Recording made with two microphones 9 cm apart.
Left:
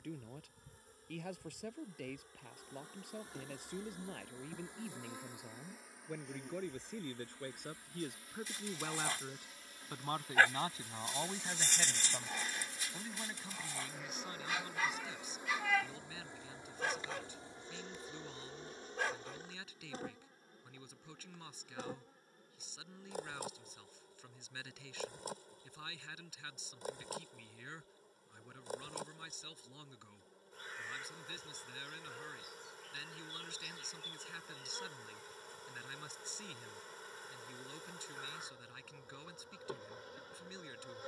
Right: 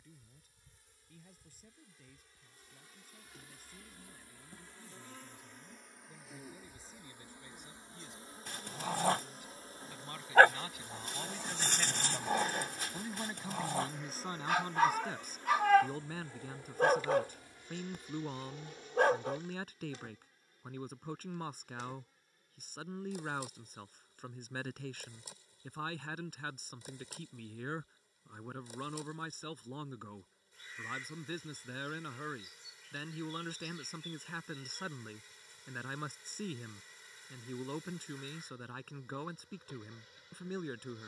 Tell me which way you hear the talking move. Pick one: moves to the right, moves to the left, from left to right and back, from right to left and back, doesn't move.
moves to the right.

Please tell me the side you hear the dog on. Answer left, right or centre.
right.